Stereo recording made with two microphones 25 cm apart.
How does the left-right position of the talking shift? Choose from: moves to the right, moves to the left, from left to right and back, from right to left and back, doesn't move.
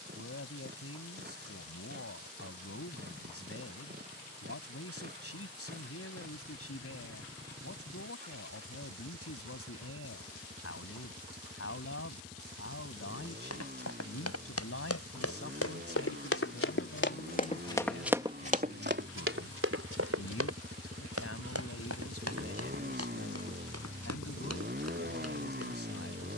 doesn't move.